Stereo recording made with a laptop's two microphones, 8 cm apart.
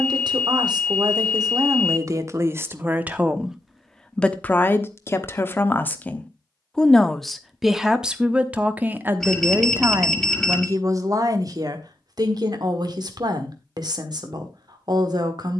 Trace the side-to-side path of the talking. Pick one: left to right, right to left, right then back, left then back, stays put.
left then back.